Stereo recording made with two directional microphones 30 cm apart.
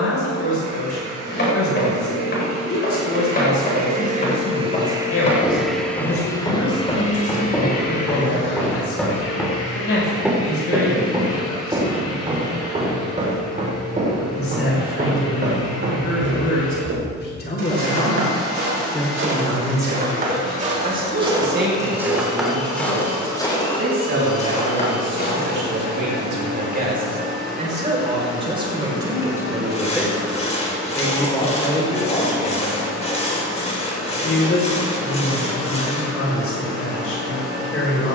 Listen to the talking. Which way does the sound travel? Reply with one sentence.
You can hear the talking move from left to right and back again.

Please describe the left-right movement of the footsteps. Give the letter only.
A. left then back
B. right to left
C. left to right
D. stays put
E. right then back
E.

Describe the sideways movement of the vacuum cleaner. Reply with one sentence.
In this clip you hear the vacuum cleaner go from the right side to the left.